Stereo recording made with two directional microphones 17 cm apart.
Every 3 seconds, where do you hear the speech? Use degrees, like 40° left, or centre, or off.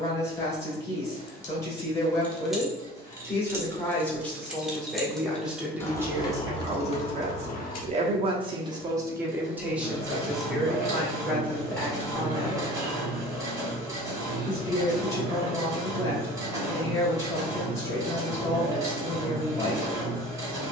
20° left, centre, 30° right, centre, 20° left, 20° left, 20° left.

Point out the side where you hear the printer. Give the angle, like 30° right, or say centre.
20° right.